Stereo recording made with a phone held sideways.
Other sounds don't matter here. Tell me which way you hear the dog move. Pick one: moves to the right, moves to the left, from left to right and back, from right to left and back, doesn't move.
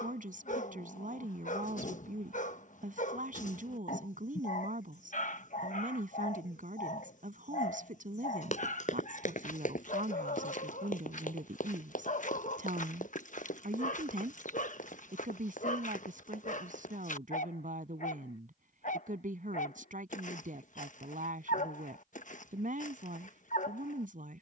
doesn't move.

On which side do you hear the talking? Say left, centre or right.
right.